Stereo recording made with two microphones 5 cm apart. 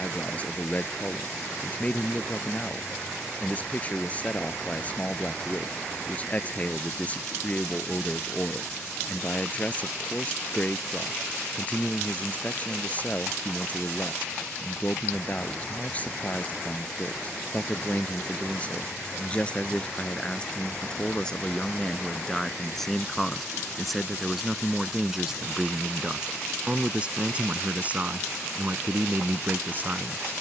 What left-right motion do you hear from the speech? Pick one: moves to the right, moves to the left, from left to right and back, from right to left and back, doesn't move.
moves to the right.